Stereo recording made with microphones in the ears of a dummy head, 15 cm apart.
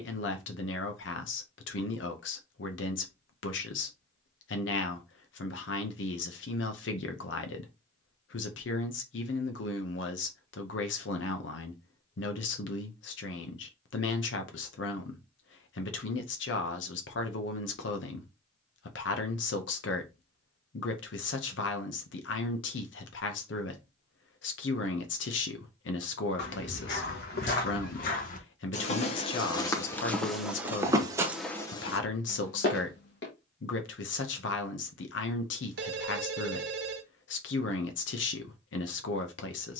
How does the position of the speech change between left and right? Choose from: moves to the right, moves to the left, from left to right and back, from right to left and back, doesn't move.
doesn't move.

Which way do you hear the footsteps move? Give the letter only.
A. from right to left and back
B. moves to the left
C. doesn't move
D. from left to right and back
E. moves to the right
D.